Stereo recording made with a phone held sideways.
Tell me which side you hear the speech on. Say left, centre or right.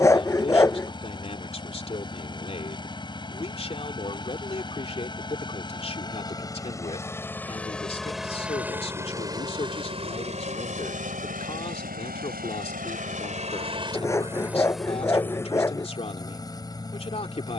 left.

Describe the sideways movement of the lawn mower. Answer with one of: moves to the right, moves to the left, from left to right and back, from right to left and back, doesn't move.
from left to right and back.